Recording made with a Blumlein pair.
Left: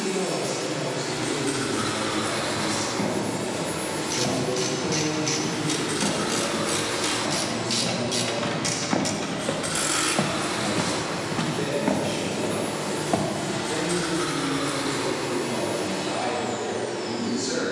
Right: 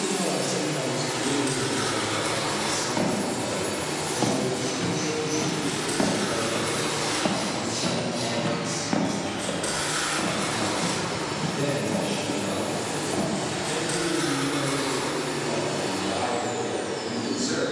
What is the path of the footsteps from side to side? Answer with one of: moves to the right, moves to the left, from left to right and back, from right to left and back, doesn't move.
moves to the left.